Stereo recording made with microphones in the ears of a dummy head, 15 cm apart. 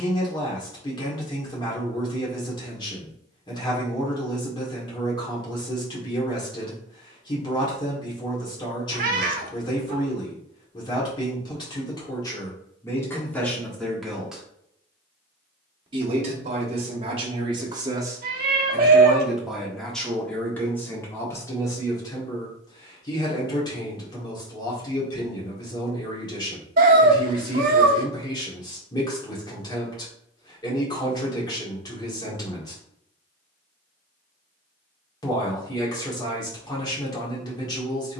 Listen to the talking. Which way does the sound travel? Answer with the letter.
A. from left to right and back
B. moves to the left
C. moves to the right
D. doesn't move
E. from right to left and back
A.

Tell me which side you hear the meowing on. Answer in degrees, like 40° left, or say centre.
50° right.